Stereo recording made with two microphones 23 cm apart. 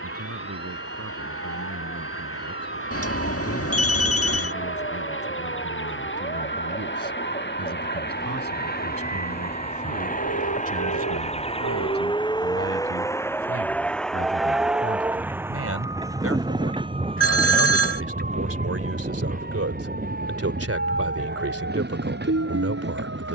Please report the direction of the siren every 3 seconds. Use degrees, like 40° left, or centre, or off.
50° left, 40° left, 40° left, 20° left, centre, 20° right, 50° right, 60° right.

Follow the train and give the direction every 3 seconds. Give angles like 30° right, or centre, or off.
70° left, 60° left, 50° left, 30° left, 10° left, 20° right, 40° right, 50° right.